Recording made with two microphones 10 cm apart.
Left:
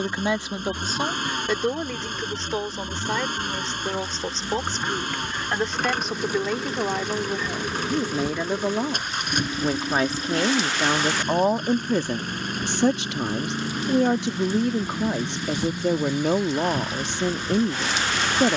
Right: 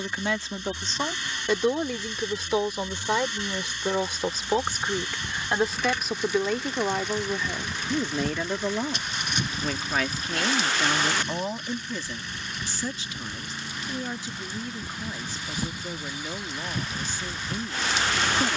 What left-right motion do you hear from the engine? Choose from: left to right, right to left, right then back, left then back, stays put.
stays put.